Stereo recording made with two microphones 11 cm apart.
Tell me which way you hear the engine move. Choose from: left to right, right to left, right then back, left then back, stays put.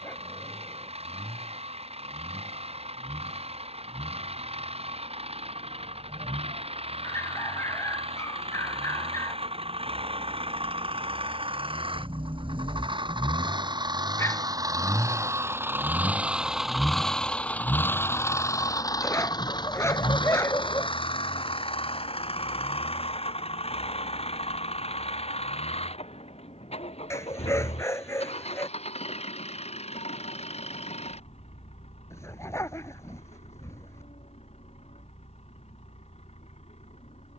right to left.